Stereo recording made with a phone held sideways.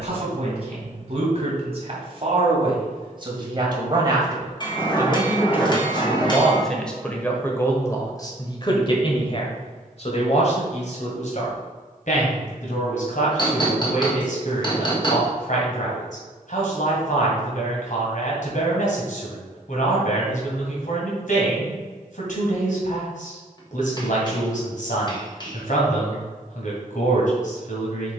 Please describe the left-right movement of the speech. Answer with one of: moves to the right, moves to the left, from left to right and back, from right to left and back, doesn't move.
moves to the left.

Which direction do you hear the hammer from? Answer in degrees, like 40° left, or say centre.
30° left.